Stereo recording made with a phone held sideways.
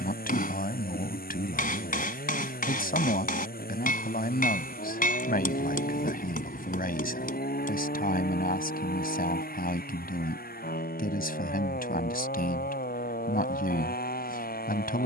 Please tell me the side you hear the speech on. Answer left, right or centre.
left.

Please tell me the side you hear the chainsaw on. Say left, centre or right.
left.